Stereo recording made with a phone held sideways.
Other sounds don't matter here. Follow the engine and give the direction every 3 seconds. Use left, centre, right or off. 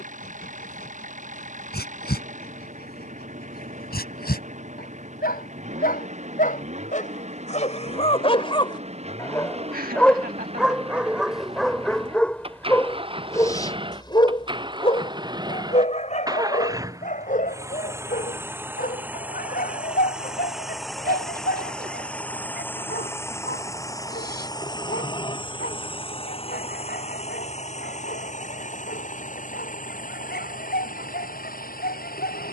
right, right, right, right, right, right, centre, centre, left, left, left.